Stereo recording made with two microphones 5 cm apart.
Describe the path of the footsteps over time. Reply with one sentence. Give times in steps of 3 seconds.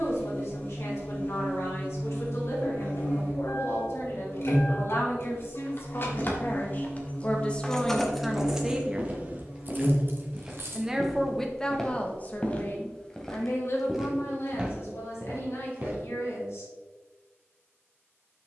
You can hear the footsteps not at all from 0 s, on the right from 6 s, in the centre from 9 s and on the right from 15 s.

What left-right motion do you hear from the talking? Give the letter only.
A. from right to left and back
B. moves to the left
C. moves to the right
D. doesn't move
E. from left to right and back
E.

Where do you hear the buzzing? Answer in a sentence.
You can hear the buzzing on the left.